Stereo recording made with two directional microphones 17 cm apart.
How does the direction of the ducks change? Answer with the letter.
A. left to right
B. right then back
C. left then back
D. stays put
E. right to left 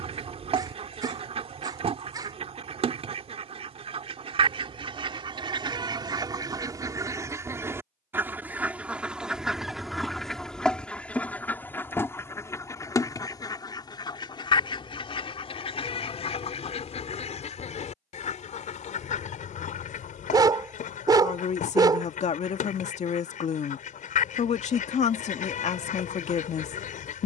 E.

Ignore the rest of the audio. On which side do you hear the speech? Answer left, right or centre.
left.